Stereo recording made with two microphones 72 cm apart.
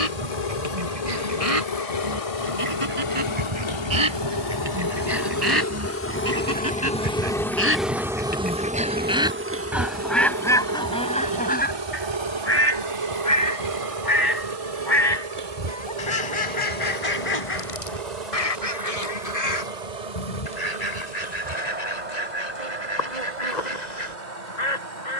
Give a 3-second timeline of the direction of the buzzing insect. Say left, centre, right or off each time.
left, left, centre, right, right, right, right, right, right.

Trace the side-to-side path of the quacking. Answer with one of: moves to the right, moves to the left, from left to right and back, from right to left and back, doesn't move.
moves to the left.